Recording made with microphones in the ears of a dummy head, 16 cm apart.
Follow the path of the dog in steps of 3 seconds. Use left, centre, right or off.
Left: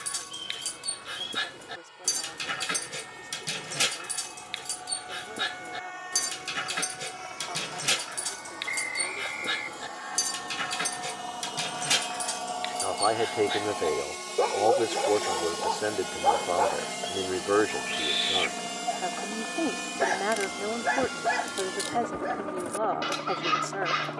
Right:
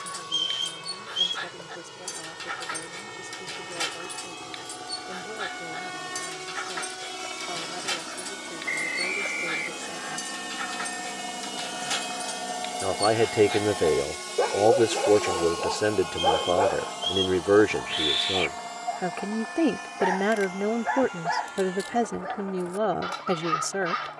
left, left, left, left, centre, right, left, left.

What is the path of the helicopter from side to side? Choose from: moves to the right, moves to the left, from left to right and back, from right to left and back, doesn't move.
moves to the left.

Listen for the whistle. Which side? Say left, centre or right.
right.